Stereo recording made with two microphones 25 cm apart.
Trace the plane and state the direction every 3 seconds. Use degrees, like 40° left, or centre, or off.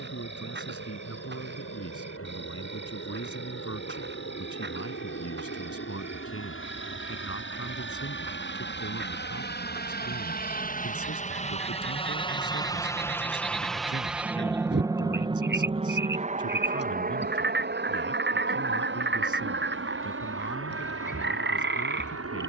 70° left, 70° left, 60° left, 40° left, centre, 30° right, 50° right, 60° right.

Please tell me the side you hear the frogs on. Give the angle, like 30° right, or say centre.
50° right.